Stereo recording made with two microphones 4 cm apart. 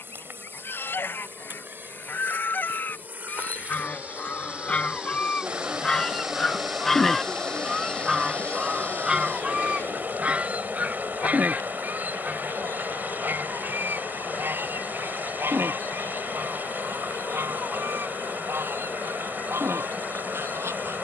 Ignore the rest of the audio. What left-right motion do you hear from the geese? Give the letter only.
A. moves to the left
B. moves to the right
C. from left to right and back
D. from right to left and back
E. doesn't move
B.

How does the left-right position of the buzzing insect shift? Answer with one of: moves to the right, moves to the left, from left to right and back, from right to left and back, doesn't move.
moves to the left.